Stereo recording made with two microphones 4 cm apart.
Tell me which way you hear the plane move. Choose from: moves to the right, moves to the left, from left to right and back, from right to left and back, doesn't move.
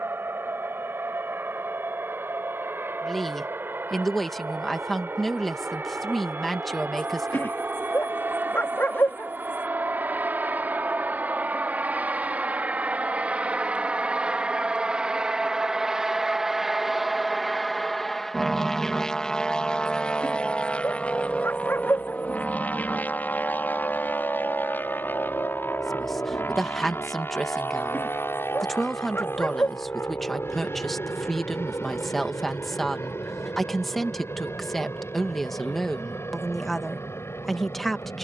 moves to the left.